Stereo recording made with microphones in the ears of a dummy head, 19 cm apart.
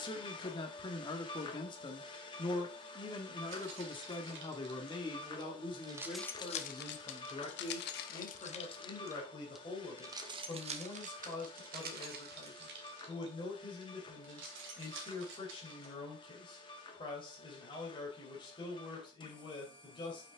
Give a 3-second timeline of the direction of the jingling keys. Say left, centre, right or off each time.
off, right, left, right, right, right, off.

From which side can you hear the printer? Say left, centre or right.
left.